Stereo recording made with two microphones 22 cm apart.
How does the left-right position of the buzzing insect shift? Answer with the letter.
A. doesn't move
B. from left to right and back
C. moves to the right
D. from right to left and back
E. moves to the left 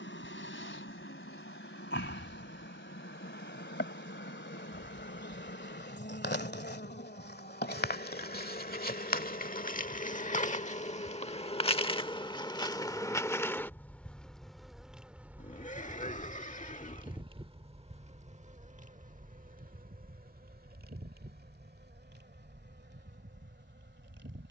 C.